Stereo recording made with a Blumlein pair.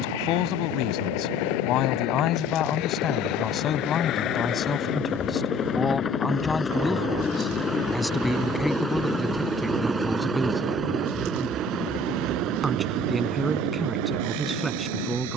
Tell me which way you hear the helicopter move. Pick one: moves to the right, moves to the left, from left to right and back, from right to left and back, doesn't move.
moves to the right.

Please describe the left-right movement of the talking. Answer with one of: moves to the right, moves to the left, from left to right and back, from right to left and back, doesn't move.
moves to the right.